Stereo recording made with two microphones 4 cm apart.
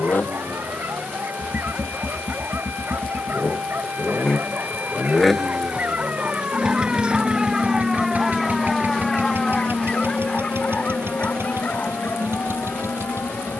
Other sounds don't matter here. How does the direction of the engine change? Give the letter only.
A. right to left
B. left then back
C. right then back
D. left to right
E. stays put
D.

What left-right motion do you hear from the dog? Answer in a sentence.
You can hear the dog go from the right side to the left.